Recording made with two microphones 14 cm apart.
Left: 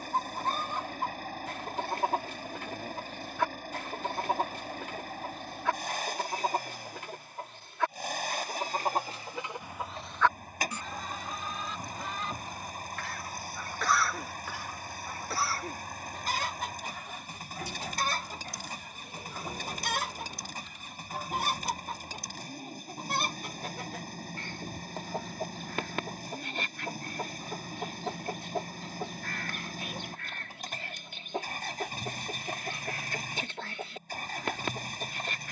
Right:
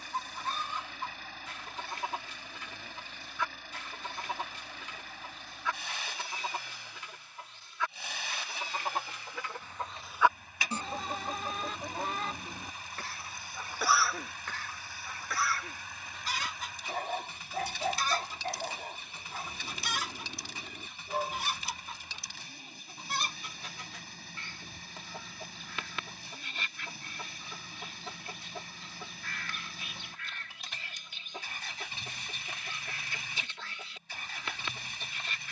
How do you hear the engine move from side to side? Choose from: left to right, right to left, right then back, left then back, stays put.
stays put.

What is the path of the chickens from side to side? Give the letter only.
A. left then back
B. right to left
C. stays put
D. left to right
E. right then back
E.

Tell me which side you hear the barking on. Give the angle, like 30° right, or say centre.
60° right.